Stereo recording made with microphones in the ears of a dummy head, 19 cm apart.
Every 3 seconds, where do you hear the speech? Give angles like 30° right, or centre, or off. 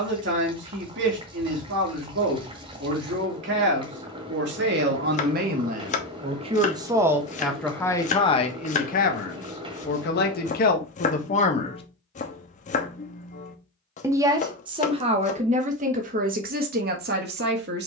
60° right, 50° right, centre, 40° left, 20° right, 40° right.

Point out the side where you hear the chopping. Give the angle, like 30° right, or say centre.
30° left.